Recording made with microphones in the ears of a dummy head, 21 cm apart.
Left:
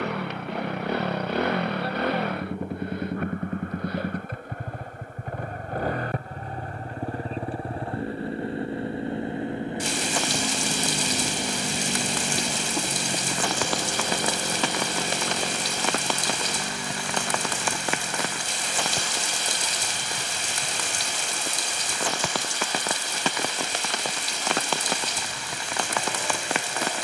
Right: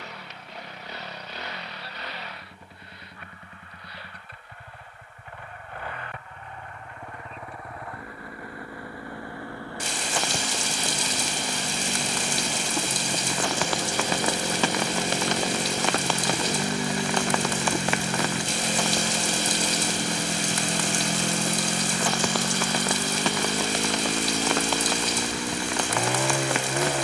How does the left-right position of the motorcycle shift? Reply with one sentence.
In this clip you hear the motorcycle move from left to right.